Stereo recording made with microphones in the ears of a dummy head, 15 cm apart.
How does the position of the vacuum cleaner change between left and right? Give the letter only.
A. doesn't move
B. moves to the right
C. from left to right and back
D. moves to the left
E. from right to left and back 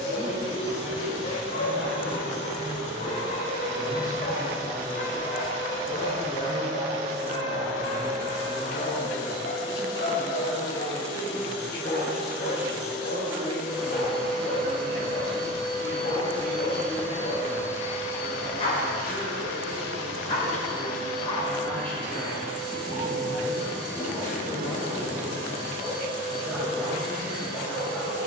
D.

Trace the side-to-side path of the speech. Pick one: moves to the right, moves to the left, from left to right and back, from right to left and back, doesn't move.
from left to right and back.